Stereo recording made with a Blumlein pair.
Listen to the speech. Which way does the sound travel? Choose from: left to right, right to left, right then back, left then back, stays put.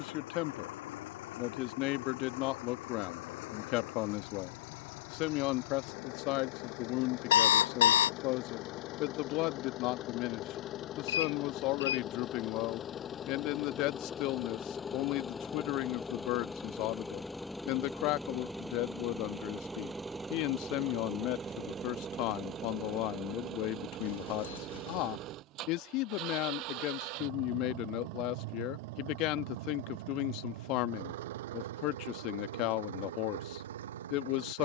stays put.